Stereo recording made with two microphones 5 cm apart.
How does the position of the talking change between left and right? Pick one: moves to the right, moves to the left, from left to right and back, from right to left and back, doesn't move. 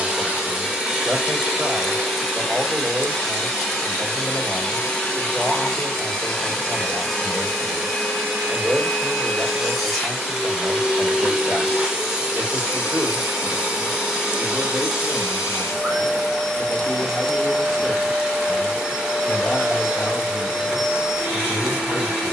moves to the left.